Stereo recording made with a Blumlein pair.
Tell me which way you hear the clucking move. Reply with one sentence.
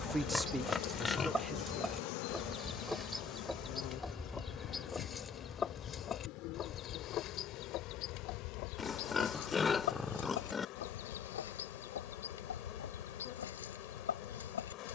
You can hear the clucking move from right to left.